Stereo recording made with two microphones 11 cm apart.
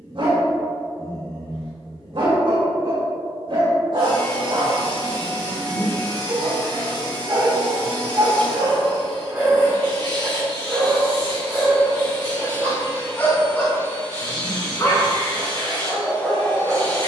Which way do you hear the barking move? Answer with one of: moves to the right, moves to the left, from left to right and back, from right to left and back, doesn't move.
moves to the left.